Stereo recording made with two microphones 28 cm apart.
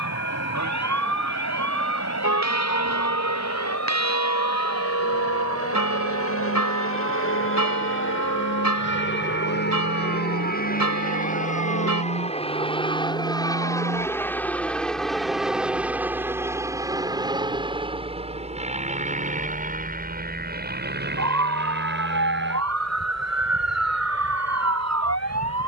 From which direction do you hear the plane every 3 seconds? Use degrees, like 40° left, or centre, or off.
70° left, 60° left, 50° left, 30° left, 10° left, 10° right, 20° right, 40° right, 40° right.